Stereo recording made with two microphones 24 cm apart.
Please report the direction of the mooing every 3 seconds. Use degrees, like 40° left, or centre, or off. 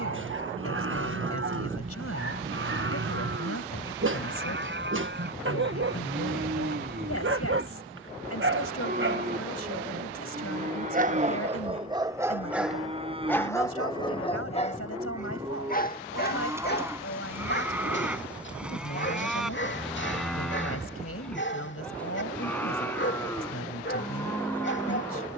60° right, 50° right, 40° right, 30° right, 20° right, 10° right, centre, 10° left, 10° left.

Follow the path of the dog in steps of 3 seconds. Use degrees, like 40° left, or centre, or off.
50° right, 50° right, 50° right, 30° right, 10° left, 40° left, 50° left, 50° left, 50° left.